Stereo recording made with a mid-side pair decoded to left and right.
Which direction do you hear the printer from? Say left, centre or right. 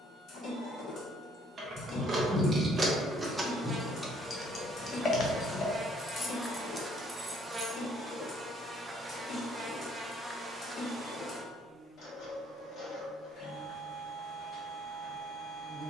left.